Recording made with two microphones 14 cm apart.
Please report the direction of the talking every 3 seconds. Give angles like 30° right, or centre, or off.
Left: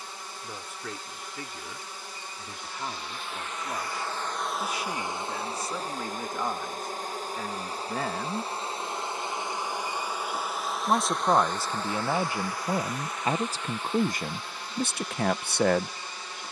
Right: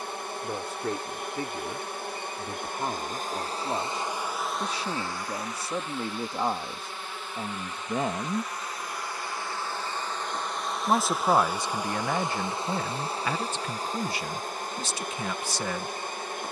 40° right, 30° right, 30° right, centre, 30° left, 60° left.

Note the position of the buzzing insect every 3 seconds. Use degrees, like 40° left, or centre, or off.
60° right, centre, 40° left, 10° left, 30° right, 50° right.